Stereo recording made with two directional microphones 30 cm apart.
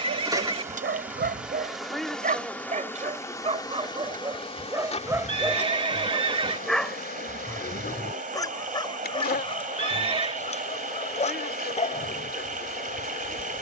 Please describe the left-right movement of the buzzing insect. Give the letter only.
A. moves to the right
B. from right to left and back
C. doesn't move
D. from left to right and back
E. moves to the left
E.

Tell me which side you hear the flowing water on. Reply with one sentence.
In this clip you hear the flowing water on the right.